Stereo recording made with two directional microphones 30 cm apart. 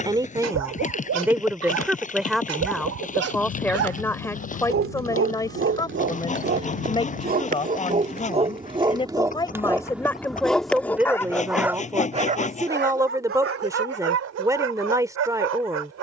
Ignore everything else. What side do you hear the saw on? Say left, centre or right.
left.